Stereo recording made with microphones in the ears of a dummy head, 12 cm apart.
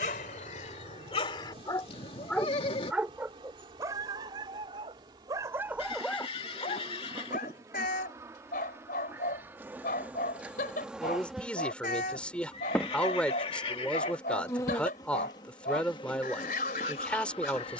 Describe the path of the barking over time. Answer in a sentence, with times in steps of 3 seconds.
You can hear the barking on the left from 0 s, on the right from 3 s and on the left from 6 s.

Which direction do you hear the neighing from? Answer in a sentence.
In this clip you hear the neighing on the left.